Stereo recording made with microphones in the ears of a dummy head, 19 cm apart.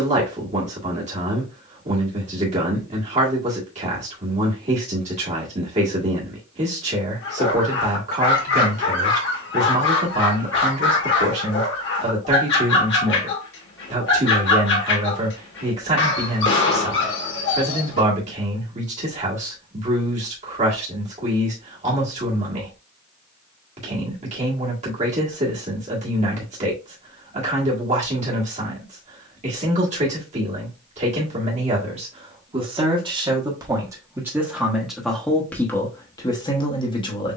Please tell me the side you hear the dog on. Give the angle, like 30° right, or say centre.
60° left.